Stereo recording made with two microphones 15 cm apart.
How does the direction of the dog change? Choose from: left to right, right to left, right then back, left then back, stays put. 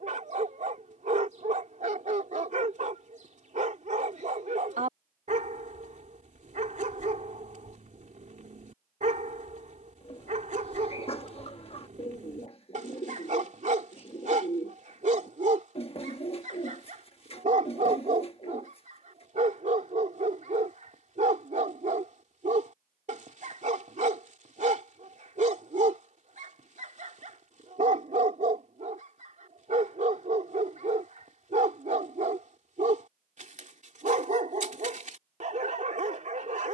stays put.